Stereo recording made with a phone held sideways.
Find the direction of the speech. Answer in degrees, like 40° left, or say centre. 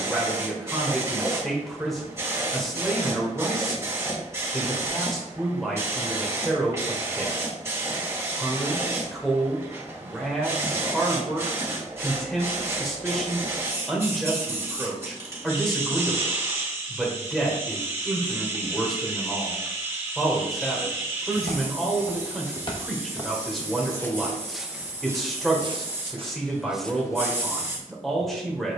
centre.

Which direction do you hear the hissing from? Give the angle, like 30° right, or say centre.
20° right.